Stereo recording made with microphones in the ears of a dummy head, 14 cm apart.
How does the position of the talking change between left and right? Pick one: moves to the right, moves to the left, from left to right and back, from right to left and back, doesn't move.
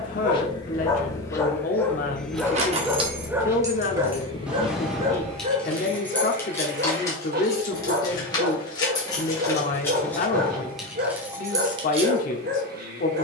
doesn't move.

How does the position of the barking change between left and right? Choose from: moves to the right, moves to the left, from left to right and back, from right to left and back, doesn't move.
moves to the right.